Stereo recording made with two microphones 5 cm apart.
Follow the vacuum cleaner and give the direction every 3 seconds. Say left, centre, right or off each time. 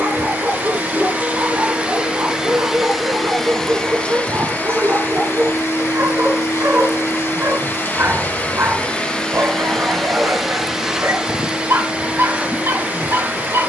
right, left, left, centre, right.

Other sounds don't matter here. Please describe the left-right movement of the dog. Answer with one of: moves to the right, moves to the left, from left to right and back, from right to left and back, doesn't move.
doesn't move.